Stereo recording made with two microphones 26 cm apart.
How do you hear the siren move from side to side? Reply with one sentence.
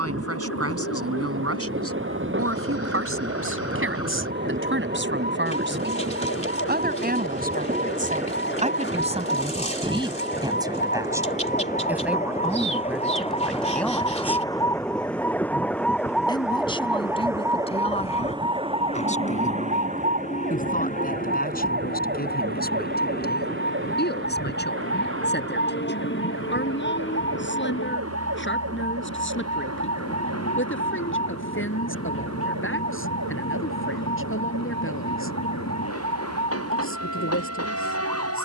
You can hear the siren move to the right.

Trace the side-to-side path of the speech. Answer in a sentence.
In this clip you hear the speech move to the left.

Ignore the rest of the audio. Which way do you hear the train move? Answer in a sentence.
You can hear the train move from right to left.